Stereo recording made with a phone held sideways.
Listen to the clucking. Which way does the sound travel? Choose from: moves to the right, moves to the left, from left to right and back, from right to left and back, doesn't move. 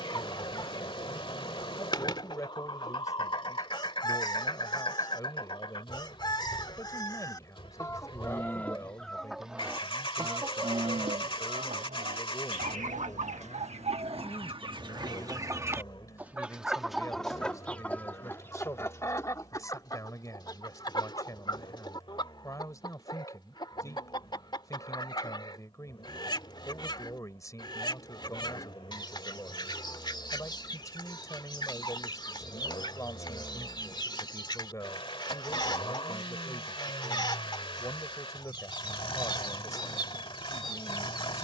from left to right and back.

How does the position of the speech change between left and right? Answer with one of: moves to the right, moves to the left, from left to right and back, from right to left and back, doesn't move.
doesn't move.